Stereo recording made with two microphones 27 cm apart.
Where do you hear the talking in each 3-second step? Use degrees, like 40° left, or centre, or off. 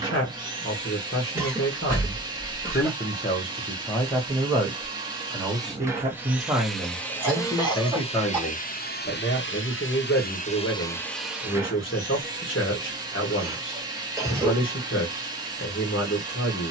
40° left, centre, centre, 40° left, 50° left, 50° left.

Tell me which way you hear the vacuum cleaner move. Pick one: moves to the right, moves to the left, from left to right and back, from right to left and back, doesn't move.
from right to left and back.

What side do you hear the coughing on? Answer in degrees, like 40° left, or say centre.
10° right.